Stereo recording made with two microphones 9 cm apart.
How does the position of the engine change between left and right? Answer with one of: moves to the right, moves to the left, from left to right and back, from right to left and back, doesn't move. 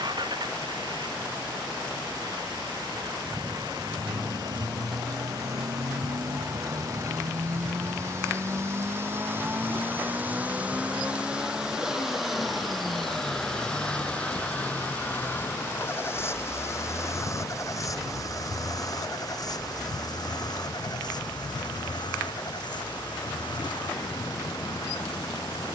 moves to the left.